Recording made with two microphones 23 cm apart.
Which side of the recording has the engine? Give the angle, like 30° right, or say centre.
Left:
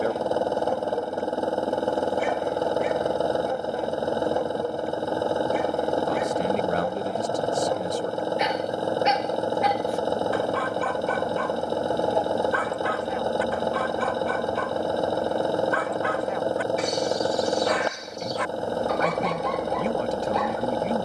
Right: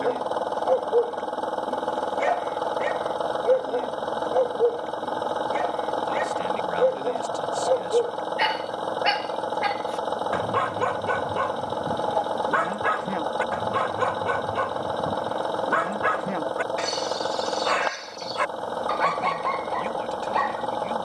20° left.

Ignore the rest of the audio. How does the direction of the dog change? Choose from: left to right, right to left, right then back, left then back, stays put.
stays put.